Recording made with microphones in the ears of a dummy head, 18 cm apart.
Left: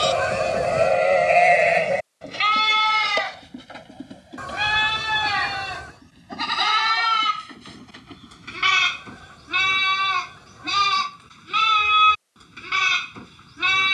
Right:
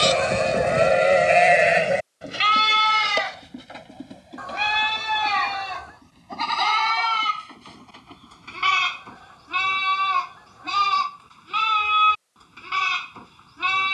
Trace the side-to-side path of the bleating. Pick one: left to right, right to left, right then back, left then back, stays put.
right to left.